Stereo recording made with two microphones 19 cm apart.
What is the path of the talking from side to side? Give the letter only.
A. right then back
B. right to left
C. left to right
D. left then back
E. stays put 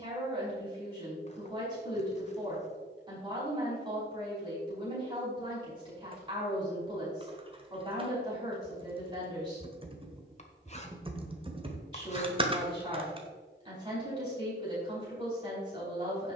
E.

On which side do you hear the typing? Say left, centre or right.
right.